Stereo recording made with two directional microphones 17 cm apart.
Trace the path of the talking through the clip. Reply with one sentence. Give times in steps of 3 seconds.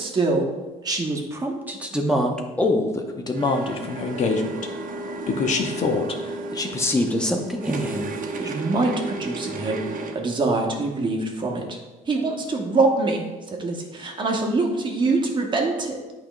You can hear the talking in the centre from 0 s, on the left from 3 s, in the centre from 6 s and on the right from 9 s.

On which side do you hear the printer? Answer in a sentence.
You can hear the printer on the right.